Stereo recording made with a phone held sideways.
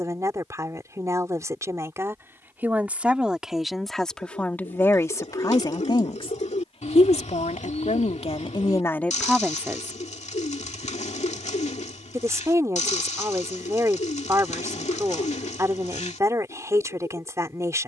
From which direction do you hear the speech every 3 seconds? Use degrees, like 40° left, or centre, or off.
20° right, 10° left, 40° left, 10° right, 20° right, 20° right.